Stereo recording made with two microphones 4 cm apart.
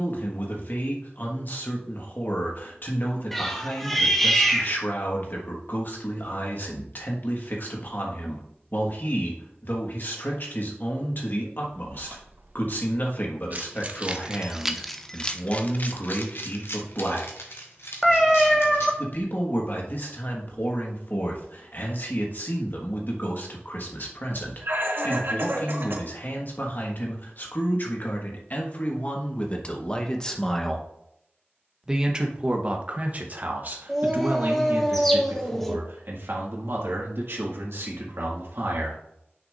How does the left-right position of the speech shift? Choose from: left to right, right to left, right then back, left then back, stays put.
left to right.